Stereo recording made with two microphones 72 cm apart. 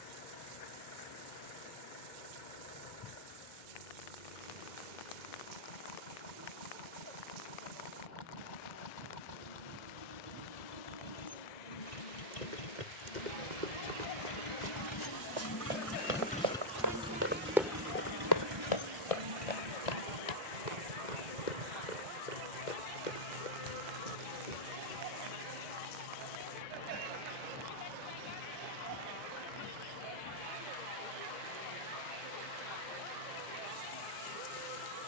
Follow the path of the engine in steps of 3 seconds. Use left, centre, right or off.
left, left, left, left, left, centre, right, right, right, right, right, right.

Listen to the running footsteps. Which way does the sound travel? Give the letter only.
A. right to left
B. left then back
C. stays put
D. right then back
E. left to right
A.